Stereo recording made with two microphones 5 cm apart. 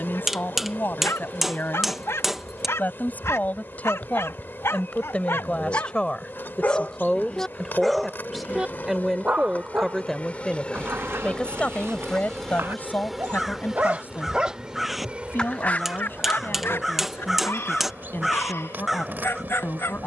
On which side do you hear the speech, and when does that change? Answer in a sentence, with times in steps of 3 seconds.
You can hear the speech on the left from 0 s, in the centre from 6 s and on the left from 12 s.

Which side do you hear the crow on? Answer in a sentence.
In this clip you hear the crow in the centre.